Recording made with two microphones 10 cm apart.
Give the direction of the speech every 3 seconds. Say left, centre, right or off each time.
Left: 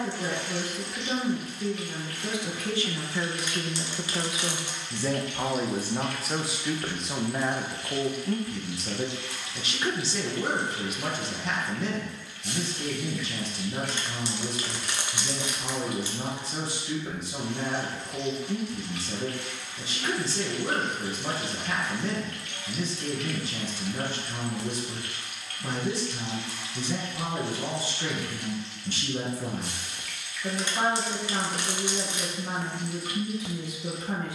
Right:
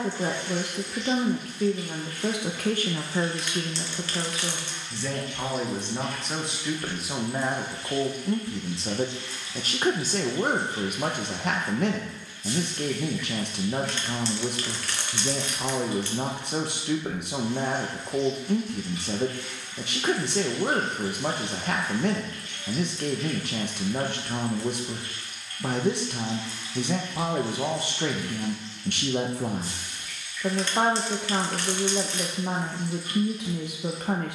right, centre, centre, right, right, right, right, right, right, right, right, right.